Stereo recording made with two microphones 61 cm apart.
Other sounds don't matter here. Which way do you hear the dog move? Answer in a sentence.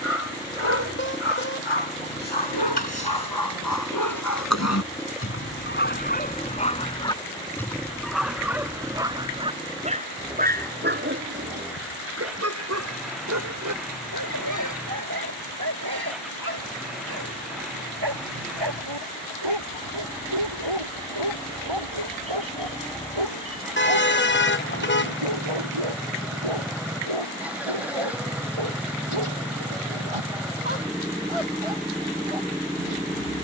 In this clip you hear the dog move to the right.